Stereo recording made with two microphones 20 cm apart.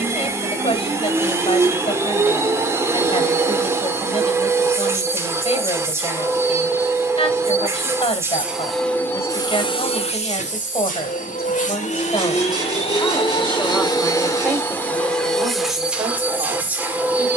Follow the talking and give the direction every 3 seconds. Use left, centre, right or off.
left, left, left, left, centre, right.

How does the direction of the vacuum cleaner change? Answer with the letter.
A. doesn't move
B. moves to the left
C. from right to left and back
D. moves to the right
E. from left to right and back
C.